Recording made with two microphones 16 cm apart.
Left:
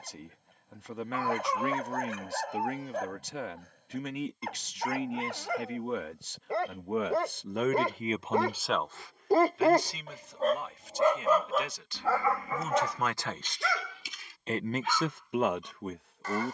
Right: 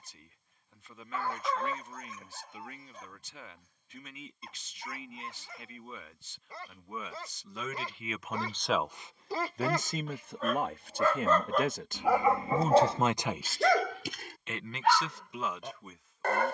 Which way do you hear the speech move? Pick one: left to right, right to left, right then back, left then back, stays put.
right then back.